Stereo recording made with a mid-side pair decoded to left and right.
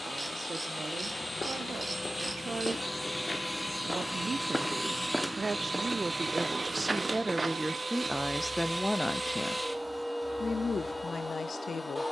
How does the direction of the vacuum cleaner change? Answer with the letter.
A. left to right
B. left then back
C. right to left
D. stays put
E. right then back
E.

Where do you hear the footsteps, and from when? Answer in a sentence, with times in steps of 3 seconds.
You can hear the footsteps on the left from 0 s, in the centre from 3 s and on the right from 6 s.